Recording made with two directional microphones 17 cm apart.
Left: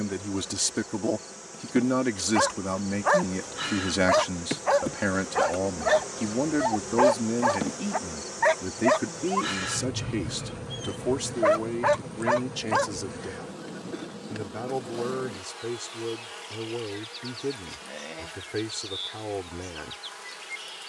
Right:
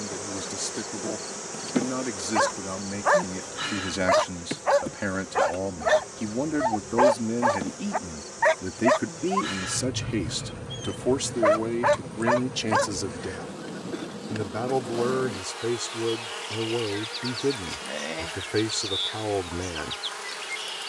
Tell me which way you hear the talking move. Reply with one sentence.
You can hear the talking go from the left side to the right.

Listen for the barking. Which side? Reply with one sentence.
You can hear the barking in the centre.